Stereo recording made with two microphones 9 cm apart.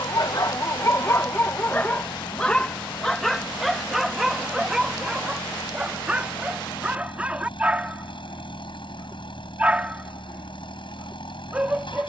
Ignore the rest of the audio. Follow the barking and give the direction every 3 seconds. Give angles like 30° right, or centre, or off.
30° left, centre, 20° right, 20° right.